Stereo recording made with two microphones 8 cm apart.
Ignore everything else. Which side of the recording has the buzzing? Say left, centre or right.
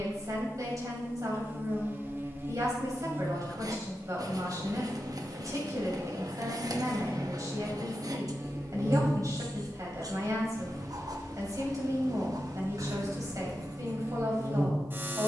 right.